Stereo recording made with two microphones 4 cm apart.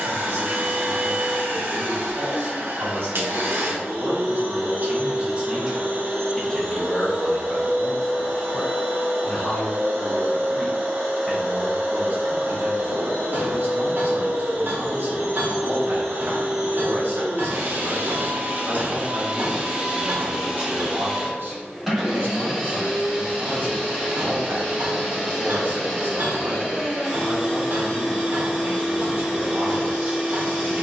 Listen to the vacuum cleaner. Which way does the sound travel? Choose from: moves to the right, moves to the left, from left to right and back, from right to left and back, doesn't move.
moves to the left.